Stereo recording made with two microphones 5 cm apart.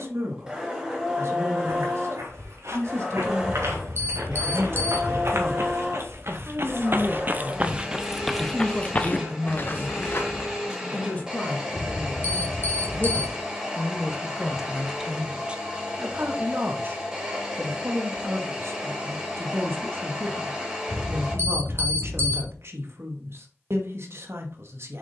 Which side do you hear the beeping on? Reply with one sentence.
In this clip you hear the beeping on the right.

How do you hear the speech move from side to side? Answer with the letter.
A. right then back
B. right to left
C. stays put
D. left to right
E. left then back
E.